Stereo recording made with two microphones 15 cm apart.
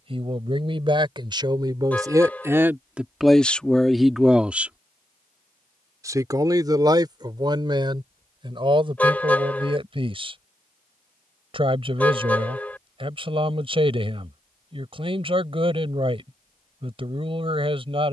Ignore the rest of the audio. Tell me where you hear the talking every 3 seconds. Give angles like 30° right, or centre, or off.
30° right, centre, 30° right, 40° right, 40° right, 40° right.